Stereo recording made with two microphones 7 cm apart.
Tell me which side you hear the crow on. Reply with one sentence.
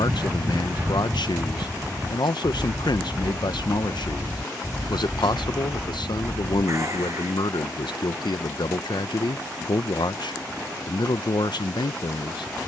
In this clip you hear the crow on the right.